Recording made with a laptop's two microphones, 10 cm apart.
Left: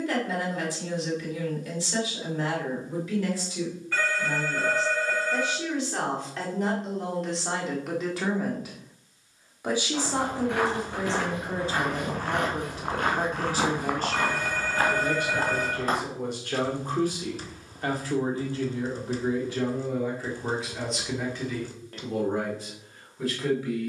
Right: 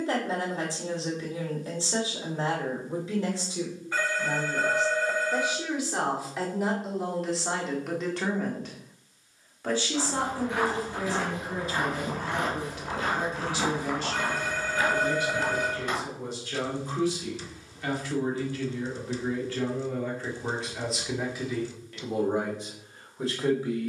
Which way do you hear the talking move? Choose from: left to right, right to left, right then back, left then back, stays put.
left then back.